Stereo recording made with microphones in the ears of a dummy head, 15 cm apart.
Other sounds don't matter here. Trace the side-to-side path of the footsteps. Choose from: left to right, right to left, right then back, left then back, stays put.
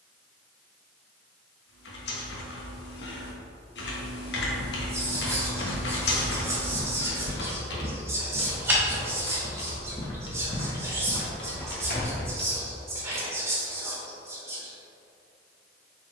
right then back.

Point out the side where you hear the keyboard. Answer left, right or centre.
left.